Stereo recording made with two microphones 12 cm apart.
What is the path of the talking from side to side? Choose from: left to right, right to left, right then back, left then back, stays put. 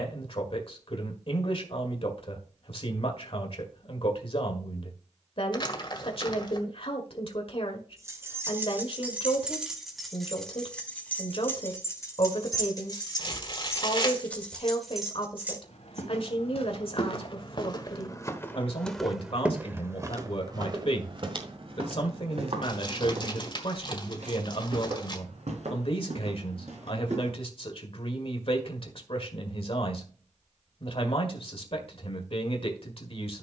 stays put.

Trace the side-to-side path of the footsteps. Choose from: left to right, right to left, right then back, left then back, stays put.
left to right.